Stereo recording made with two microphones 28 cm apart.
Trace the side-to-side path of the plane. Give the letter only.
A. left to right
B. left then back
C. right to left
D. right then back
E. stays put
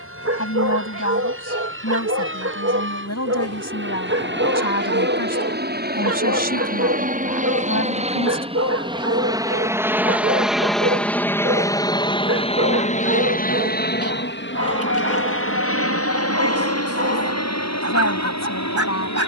C.